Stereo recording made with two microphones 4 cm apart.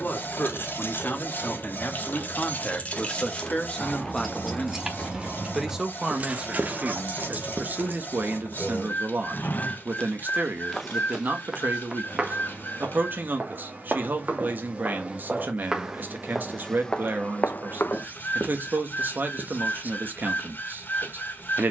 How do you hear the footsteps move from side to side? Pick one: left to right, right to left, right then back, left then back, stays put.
right then back.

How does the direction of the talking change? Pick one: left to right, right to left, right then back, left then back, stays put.
left to right.